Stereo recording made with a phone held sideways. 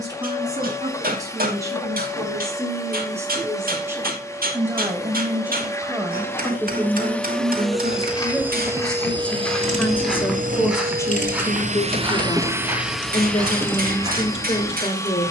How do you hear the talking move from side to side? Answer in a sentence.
In this clip you hear the talking go from the right side to the left.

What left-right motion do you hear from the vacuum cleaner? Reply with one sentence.
You can hear the vacuum cleaner go right and come back.